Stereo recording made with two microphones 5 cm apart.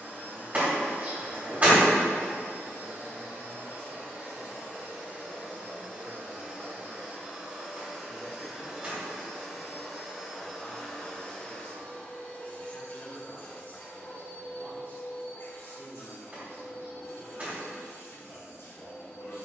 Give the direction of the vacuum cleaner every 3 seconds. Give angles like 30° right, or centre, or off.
40° right, 30° right, 20° right, 10° left, 40° left, 60° left, 70° left.